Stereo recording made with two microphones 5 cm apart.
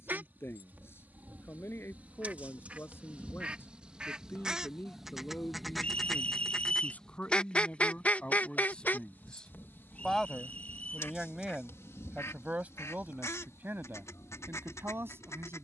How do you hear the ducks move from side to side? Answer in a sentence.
You can hear the ducks move to the left.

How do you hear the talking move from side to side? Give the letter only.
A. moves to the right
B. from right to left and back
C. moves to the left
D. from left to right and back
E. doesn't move
A.